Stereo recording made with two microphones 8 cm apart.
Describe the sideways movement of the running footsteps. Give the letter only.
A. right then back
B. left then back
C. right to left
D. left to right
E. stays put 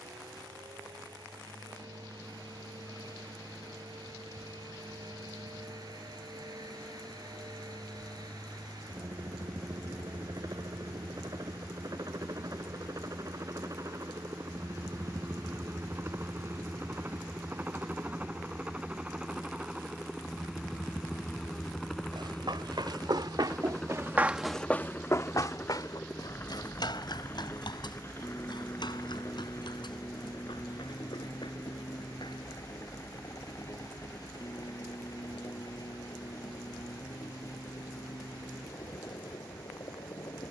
C.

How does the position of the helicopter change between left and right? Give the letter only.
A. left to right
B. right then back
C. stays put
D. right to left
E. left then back
D.